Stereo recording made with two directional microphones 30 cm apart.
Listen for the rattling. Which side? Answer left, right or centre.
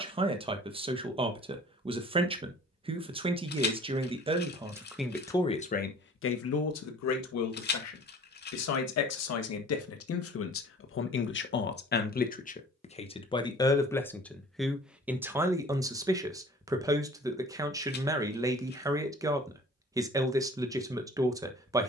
left.